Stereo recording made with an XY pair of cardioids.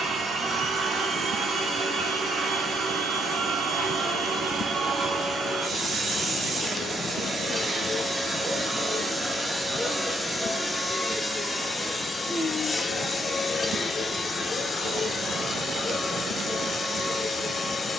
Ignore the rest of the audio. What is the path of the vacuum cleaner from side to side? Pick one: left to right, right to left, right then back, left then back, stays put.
right to left.